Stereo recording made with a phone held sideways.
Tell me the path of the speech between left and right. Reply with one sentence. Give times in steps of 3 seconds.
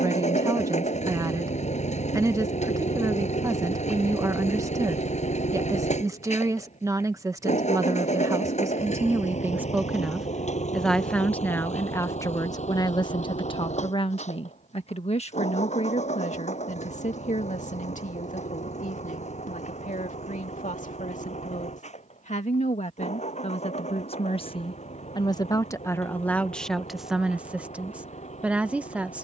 You can hear the speech on the right from 0 s, in the centre from 9 s, on the left from 12 s and in the centre from 27 s.